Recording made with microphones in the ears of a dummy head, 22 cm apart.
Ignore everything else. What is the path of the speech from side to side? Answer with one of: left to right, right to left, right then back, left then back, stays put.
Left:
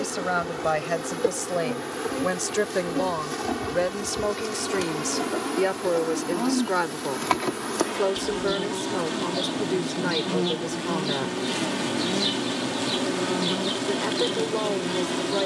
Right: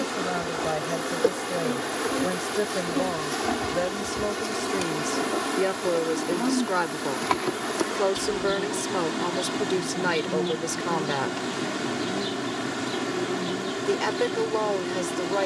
left to right.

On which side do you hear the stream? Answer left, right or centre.
right.